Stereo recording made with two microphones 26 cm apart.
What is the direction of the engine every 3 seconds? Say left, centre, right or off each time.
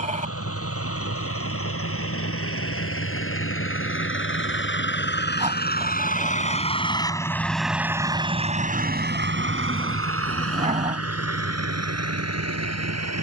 left, left, centre, right, right.